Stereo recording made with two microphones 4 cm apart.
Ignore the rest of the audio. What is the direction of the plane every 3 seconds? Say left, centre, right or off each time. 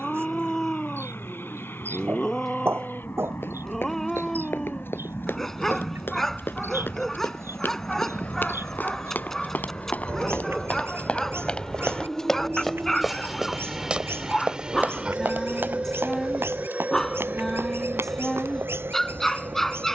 left, left, left, left, centre, right, right.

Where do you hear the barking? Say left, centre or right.
centre.